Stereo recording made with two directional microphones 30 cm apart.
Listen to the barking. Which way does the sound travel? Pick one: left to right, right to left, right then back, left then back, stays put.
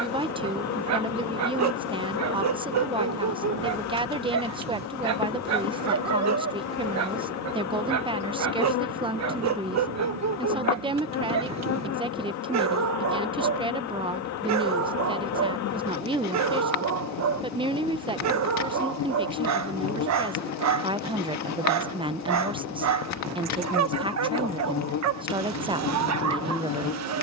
stays put.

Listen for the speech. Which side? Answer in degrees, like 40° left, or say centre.
20° right.